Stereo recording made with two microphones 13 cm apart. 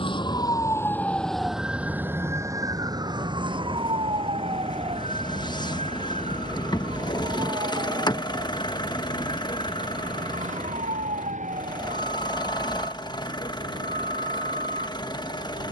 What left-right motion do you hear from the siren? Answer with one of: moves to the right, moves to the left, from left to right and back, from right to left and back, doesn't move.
moves to the right.